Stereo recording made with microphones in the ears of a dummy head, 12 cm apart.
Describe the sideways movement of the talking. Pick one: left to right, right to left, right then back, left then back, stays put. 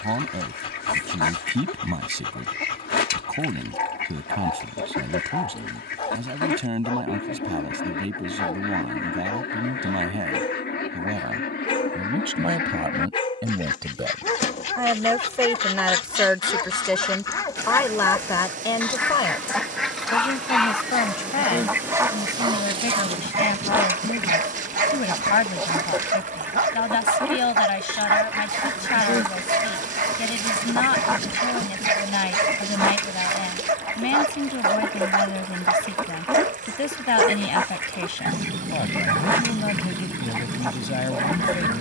right to left.